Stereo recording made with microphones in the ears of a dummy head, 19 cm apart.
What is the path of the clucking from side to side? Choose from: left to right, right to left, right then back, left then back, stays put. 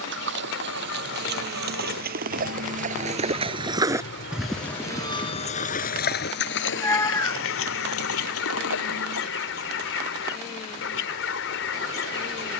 stays put.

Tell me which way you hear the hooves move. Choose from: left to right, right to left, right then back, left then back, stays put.
right to left.